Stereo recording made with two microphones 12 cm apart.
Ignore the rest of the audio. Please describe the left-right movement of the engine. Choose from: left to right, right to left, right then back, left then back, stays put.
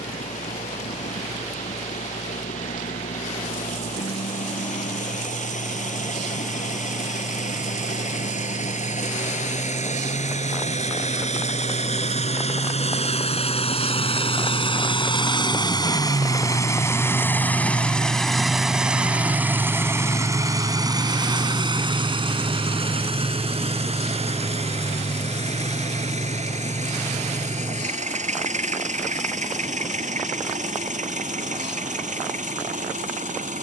left to right.